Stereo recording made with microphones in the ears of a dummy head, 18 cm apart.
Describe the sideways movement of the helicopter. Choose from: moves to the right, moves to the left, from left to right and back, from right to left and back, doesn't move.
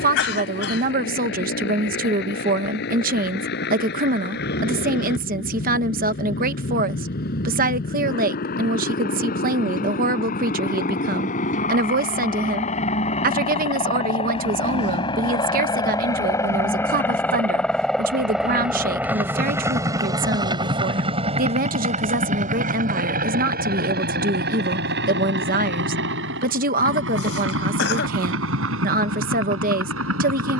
moves to the right.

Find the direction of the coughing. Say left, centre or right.
left.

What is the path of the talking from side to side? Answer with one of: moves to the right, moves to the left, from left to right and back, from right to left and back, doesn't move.
doesn't move.